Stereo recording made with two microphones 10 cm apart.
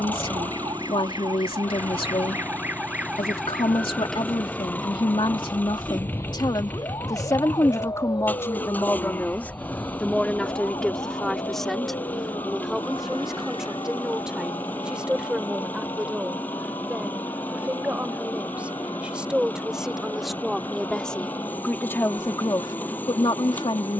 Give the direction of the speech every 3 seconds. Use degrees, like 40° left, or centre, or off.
70° left, 60° left, 40° left, 10° left, 10° right, 10° right, 10° right, 40° left.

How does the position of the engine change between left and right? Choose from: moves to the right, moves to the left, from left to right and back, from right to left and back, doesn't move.
doesn't move.